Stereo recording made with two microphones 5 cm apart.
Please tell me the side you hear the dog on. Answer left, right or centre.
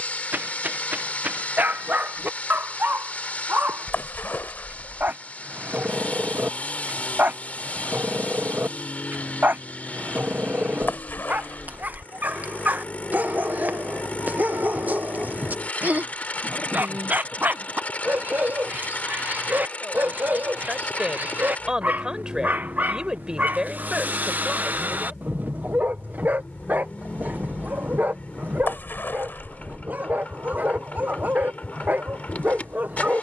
right.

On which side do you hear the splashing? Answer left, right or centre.
left.